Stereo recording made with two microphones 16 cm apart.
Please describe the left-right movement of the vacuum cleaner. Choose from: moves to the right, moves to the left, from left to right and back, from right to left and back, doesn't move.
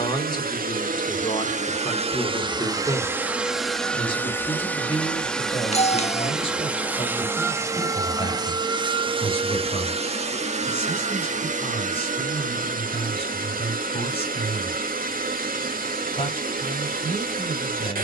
from right to left and back.